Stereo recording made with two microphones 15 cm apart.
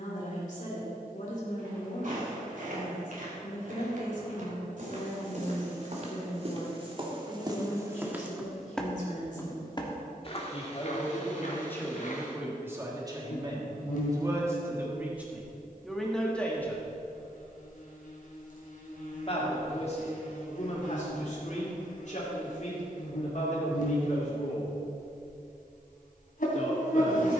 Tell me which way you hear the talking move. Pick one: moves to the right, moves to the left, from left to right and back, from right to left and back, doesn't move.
from left to right and back.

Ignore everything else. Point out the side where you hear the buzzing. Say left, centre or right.
left.